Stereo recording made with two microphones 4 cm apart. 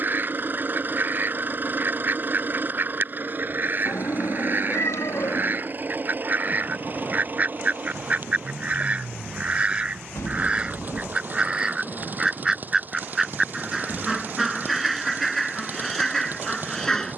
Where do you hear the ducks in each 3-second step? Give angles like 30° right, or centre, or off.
50° right, 50° right, 40° right, 20° right, 10° right, centre.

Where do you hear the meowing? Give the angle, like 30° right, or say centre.
80° left.